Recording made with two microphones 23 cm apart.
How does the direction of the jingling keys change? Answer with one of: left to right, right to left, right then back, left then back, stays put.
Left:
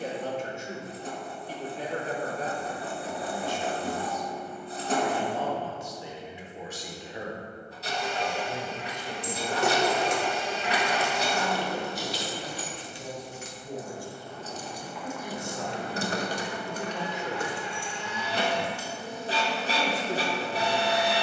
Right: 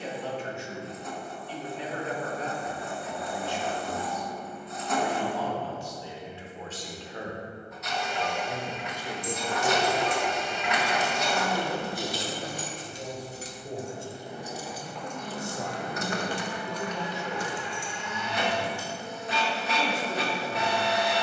right then back.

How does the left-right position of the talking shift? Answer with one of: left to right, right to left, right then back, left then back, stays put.
right then back.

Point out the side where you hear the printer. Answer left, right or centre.
left.